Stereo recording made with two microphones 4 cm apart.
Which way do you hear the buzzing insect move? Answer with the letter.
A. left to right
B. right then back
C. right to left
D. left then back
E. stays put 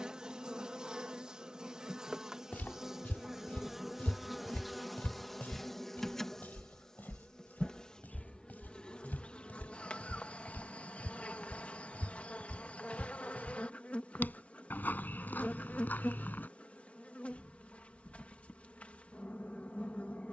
C.